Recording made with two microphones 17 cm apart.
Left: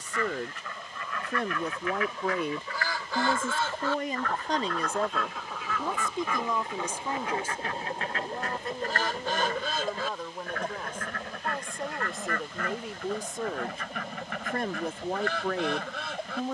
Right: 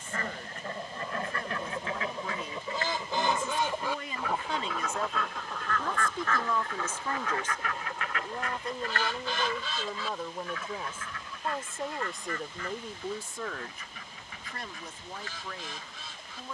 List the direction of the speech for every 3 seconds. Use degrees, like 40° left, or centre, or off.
70° left, 40° left, 10° left, centre, 20° left, 70° left.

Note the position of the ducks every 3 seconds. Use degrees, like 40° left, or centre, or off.
30° right, 10° right, 30° left, 60° left, 70° left, 70° left.